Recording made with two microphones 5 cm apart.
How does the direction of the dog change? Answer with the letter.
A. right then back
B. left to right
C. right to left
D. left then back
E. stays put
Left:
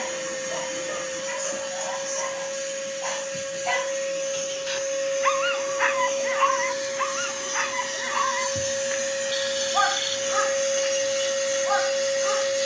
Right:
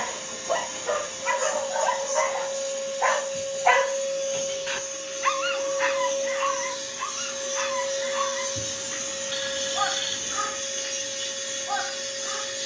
C.